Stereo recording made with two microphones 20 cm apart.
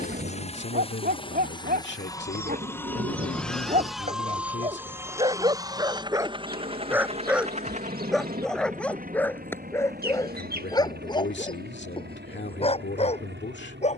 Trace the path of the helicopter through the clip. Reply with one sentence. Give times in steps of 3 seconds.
You can hear the helicopter on the left from 0 s, in the centre from 3 s and on the right from 6 s.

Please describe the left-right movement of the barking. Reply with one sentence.
In this clip you hear the barking move from right to left.